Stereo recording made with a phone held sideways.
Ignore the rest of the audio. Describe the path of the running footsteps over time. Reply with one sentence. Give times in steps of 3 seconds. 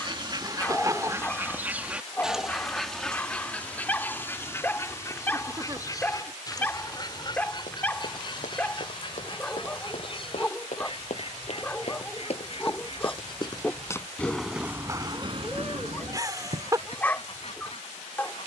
In this clip you hear the running footsteps not at all from 0 s, on the left from 6 s and on the right from 15 s.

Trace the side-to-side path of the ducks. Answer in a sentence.
In this clip you hear the ducks move to the left.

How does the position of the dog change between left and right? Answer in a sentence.
You can hear the dog stay put.